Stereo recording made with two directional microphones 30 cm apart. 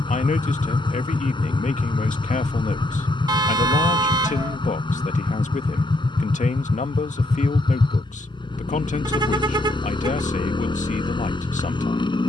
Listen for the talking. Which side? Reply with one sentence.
You can hear the talking on the left.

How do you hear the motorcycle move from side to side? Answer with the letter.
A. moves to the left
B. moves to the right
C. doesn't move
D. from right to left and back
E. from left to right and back
C.